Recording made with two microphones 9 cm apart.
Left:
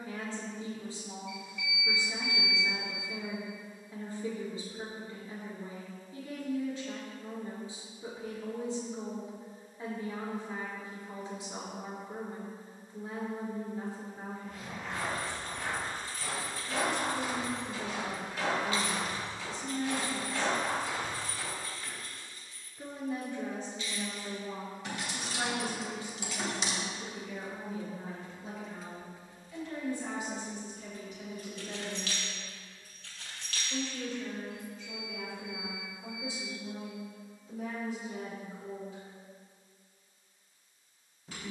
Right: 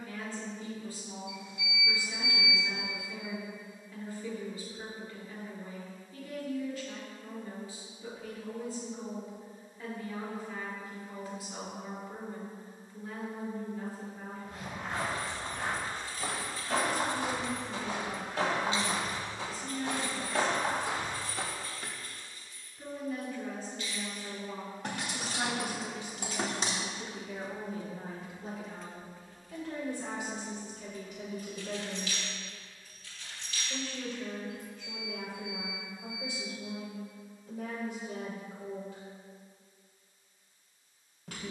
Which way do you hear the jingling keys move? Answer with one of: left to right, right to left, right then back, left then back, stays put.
right then back.